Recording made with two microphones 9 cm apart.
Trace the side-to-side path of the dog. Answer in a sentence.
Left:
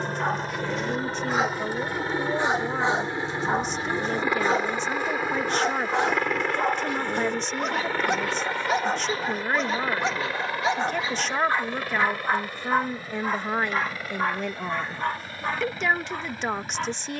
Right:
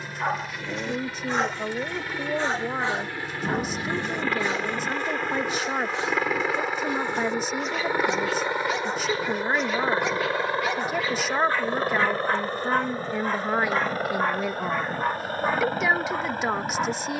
In this clip you hear the dog move from right to left and back again.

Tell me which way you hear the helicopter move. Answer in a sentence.
You can hear the helicopter move from left to right.